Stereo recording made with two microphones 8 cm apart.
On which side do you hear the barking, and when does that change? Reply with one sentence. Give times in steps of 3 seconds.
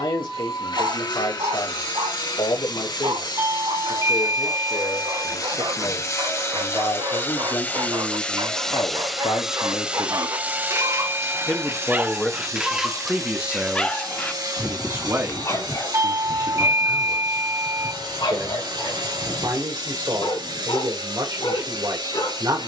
In this clip you hear the barking on the right from 0 s, in the centre from 12 s and on the left from 15 s.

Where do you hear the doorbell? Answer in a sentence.
In this clip you hear the doorbell on the right.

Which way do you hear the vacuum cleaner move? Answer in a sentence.
You can hear the vacuum cleaner go from the left side to the right.